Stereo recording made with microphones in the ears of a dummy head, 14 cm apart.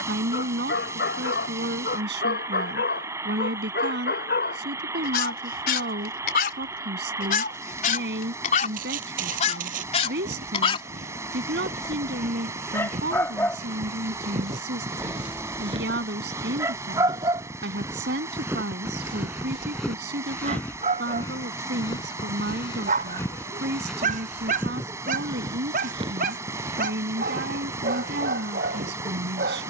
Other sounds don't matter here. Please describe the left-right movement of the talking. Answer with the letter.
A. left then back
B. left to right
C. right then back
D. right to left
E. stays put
E.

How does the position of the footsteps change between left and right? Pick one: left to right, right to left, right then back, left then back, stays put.
left then back.